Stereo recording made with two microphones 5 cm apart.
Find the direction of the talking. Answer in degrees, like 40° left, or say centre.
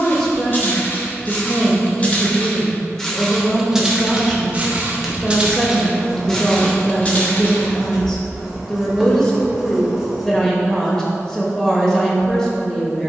10° left.